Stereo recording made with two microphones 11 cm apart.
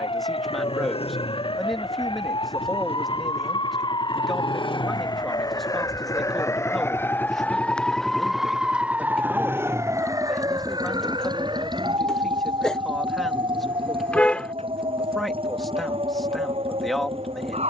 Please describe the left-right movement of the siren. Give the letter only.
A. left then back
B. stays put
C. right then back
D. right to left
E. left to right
E.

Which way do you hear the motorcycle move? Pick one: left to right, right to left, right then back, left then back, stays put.
left to right.